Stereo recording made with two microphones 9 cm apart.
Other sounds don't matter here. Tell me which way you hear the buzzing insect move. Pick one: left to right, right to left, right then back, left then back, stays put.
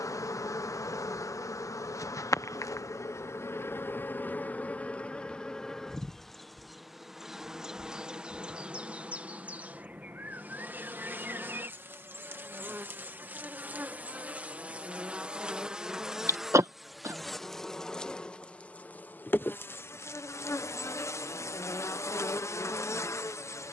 right then back.